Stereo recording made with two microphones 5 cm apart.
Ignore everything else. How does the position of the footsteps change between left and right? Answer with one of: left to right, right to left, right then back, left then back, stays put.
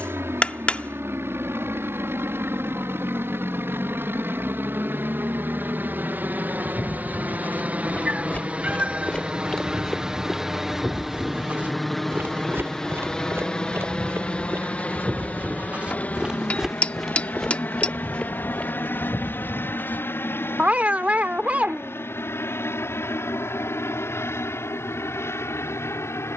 right then back.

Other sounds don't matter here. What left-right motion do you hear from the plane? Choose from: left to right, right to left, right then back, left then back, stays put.
right to left.